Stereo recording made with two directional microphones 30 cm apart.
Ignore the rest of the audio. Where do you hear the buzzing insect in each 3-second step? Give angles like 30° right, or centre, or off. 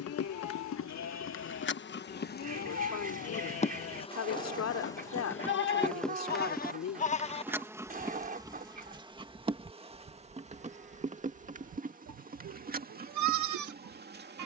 40° left, 10° left, 10° right, 20° right, 30° right.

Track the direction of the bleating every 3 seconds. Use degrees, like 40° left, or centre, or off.
50° left, 40° left, 10° left, 30° right, 60° right.